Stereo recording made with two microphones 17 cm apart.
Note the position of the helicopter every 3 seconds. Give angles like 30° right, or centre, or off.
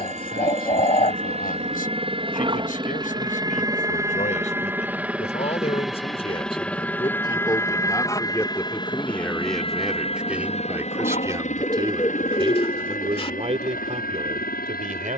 30° right, 10° right, 10° left, 40° left, 50° left.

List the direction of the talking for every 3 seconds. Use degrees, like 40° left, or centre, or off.
50° left, 40° left, 20° left, 10° right, 40° right.